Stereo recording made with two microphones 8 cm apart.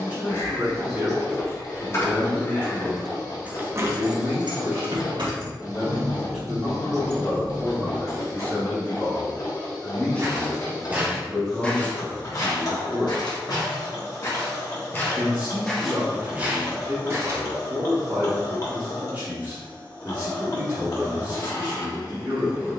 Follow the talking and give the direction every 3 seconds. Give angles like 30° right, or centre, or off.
30° right, 20° right, 10° left, 10° left, 10° right, 20° right, 20° right, 20° right.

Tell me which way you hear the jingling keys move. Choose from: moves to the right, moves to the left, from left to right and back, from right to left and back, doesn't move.
from left to right and back.